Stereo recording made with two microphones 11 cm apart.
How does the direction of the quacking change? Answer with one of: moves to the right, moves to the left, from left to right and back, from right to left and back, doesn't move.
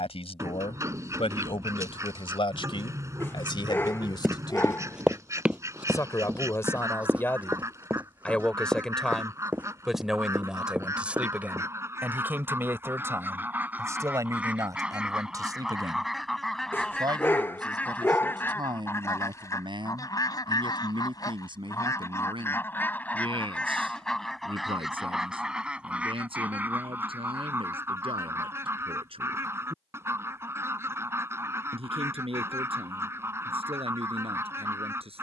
from right to left and back.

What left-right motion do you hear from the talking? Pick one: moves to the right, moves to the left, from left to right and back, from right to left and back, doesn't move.
moves to the right.